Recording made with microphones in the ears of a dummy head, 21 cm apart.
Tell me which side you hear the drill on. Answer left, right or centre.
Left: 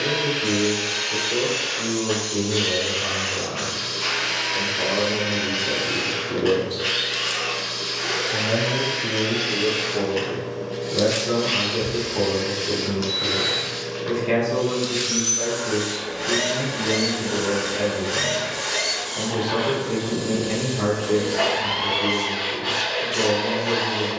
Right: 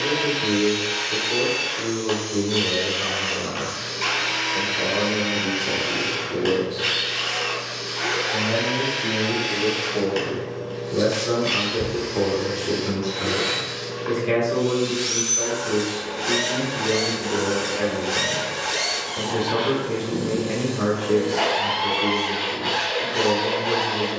right.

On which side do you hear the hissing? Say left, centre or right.
left.